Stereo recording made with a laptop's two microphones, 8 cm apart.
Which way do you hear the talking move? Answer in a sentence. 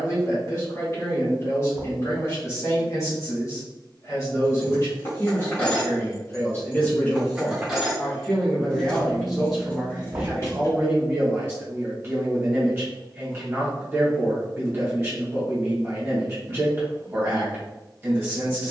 You can hear the talking go from the left side to the right.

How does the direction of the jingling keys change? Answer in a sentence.
In this clip you hear the jingling keys go right and come back.